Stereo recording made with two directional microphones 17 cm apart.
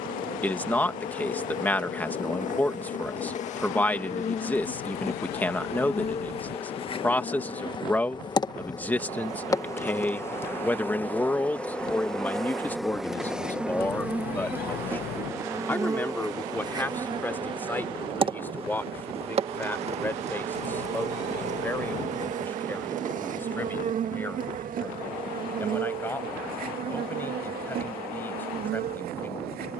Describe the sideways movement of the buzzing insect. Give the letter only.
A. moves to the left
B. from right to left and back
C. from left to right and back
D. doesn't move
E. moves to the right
E.